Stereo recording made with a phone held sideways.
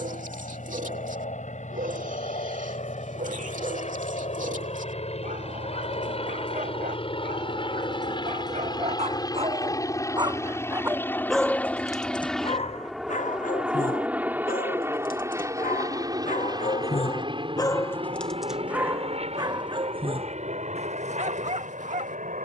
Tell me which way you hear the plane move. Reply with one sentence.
You can hear the plane go from the left side to the right.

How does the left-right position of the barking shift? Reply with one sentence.
You can hear the barking go left and come back.